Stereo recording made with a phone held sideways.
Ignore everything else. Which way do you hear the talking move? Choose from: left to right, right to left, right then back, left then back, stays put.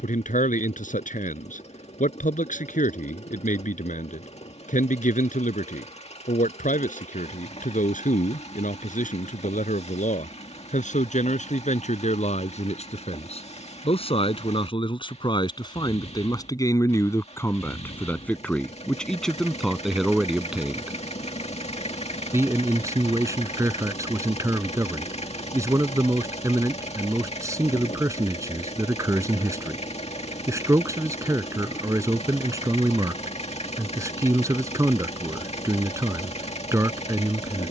left to right.